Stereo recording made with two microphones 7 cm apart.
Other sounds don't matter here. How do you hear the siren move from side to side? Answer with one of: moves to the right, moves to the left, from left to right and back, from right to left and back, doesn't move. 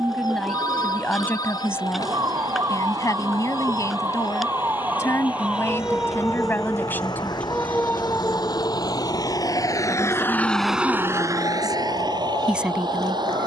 moves to the left.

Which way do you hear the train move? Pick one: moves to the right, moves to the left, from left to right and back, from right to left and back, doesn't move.
moves to the right.